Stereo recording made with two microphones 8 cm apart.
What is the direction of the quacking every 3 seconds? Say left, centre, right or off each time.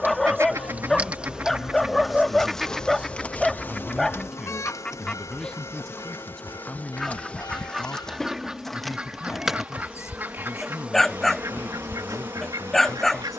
right, centre, centre, right, right.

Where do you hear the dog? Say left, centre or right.
centre.